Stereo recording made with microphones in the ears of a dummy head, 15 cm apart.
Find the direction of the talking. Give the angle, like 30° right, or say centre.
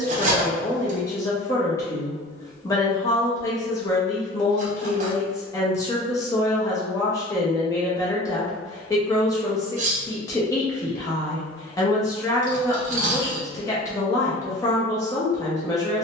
20° left.